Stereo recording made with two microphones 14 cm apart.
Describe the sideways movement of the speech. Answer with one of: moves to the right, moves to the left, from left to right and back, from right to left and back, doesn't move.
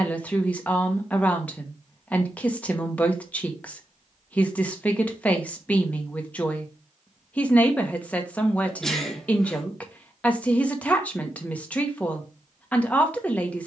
doesn't move.